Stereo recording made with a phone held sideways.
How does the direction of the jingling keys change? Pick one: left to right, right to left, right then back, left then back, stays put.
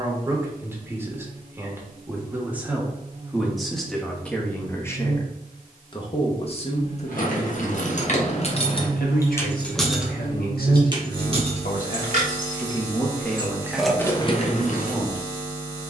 right then back.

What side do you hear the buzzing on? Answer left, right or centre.
right.